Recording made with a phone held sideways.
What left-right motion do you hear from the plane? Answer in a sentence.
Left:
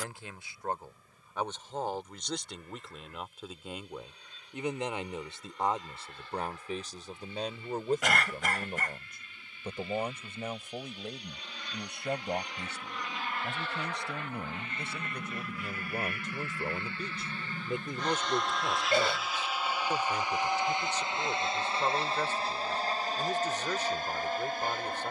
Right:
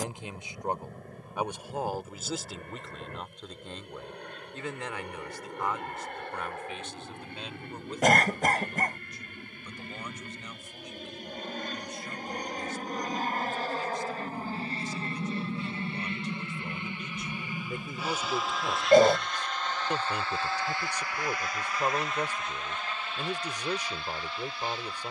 In this clip you hear the plane move to the left.